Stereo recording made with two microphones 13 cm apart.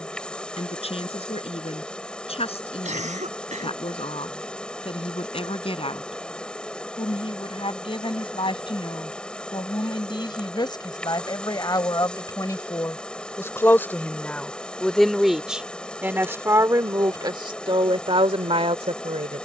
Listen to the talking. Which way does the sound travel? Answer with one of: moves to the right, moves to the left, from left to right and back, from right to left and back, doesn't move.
moves to the right.